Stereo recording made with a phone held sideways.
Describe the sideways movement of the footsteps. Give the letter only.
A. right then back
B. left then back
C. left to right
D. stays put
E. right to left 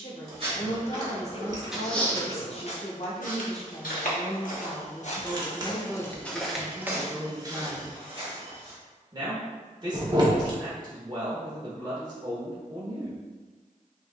B.